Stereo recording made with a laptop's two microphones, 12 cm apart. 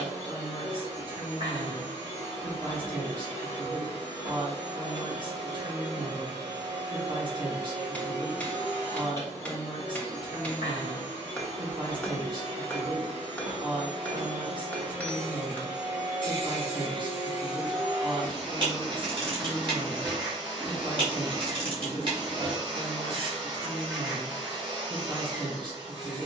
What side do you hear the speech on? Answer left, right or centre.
right.